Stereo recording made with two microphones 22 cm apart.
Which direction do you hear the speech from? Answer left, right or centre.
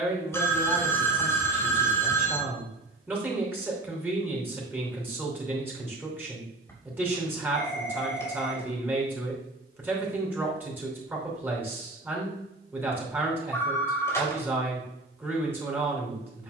centre.